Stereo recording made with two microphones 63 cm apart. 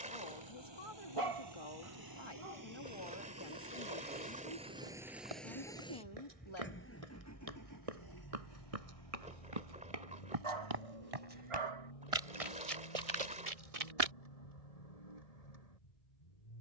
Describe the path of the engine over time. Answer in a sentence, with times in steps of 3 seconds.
In this clip you hear the engine on the right from 0 s, in the centre from 3 s and on the left from 6 s.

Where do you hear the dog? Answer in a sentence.
You can hear the dog on the right.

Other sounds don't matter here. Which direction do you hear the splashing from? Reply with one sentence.
In this clip you hear the splashing in the centre.